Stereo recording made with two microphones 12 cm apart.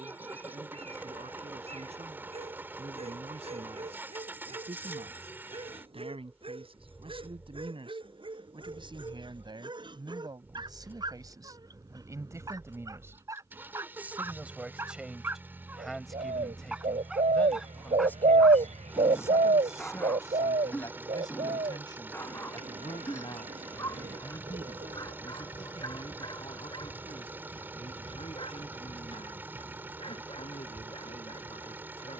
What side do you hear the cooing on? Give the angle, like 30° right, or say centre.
80° right.